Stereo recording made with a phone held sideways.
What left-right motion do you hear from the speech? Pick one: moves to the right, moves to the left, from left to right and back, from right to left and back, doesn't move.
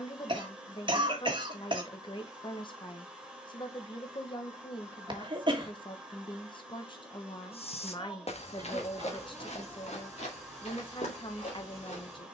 doesn't move.